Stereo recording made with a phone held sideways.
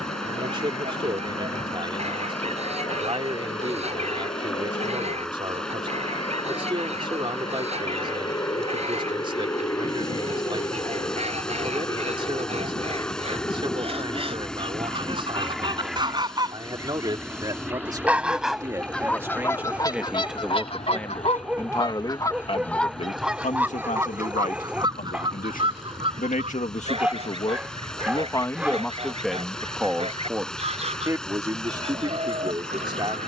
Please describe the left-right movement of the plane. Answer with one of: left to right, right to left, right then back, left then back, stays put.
left to right.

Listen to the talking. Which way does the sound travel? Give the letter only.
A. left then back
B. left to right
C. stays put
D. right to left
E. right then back
A.